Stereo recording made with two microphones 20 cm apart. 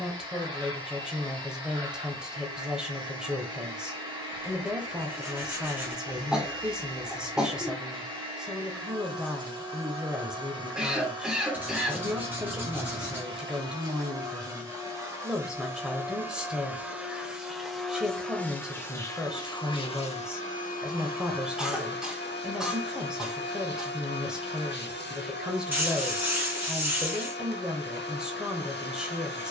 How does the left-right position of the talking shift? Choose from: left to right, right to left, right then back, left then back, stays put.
stays put.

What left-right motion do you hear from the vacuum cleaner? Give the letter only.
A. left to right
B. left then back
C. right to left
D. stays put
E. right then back
C.